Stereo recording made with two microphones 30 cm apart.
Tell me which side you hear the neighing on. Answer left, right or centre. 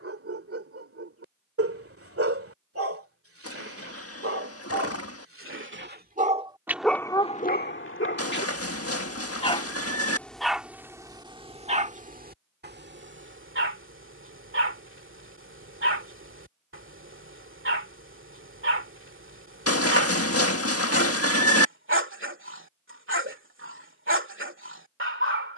left.